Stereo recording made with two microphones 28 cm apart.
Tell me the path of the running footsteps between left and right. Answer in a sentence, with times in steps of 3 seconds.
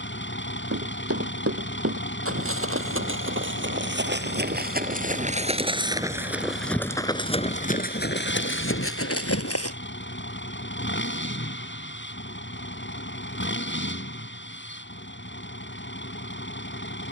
You can hear the running footsteps on the right from 0 s, on the left from 6 s and not at all from 12 s.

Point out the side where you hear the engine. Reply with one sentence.
You can hear the engine on the left.